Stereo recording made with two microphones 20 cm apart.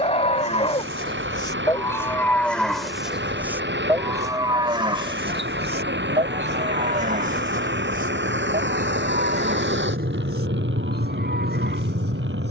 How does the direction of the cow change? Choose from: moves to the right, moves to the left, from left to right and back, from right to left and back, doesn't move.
moves to the right.